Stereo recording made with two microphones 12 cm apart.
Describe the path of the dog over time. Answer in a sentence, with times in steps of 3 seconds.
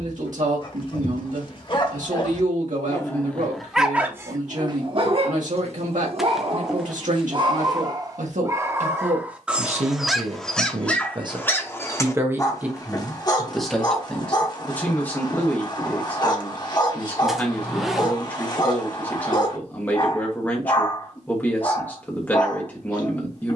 In this clip you hear the dog on the left from 0 s, on the right from 3 s, in the centre from 9 s and on the left from 12 s.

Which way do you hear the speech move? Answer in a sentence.
You can hear the speech go from the right side to the left.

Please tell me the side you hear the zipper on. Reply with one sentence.
In this clip you hear the zipper in the centre.